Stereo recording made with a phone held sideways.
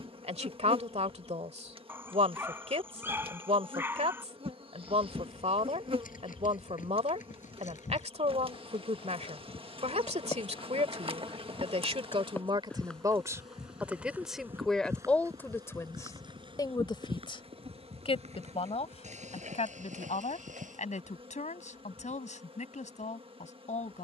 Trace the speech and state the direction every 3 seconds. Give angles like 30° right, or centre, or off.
40° right, 40° right, 40° right, 40° right, 20° right, 20° left, 40° left, 50° left.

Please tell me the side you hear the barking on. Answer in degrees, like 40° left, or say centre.
10° right.